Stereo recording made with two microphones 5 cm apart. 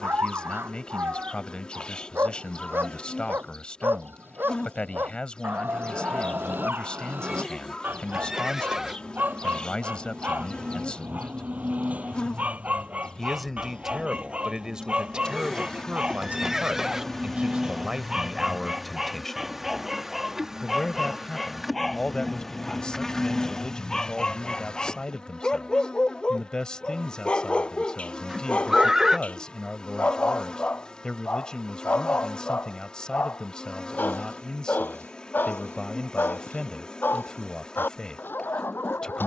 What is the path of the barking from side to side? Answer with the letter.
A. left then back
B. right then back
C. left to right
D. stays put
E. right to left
E.